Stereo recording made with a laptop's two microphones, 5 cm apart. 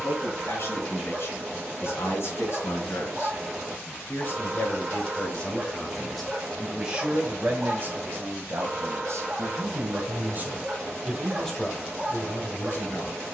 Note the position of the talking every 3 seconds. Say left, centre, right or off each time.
left, left, right, right, left.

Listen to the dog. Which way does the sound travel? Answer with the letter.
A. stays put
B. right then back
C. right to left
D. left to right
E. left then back
A.